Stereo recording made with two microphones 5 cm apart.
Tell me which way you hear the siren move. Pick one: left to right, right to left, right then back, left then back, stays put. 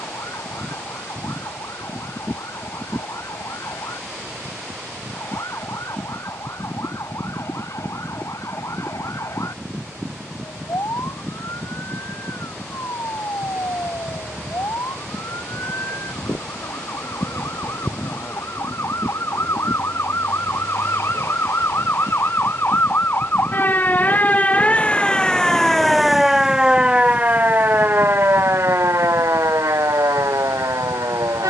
left to right.